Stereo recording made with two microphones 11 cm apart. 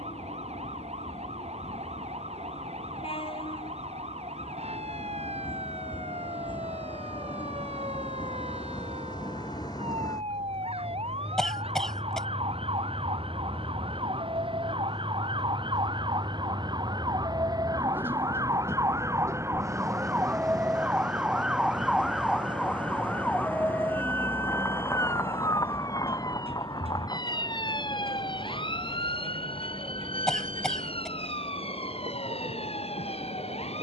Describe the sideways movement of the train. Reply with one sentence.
In this clip you hear the train move from left to right.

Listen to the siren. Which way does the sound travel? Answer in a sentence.
You can hear the siren go from the right side to the left.